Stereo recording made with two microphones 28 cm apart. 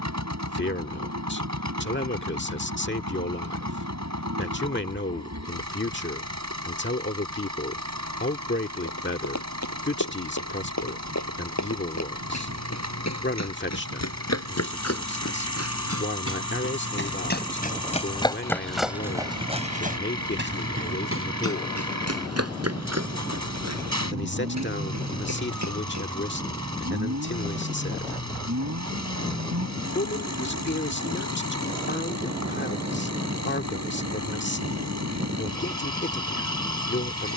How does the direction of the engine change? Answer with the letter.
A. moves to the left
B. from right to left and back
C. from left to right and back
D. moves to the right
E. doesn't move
E.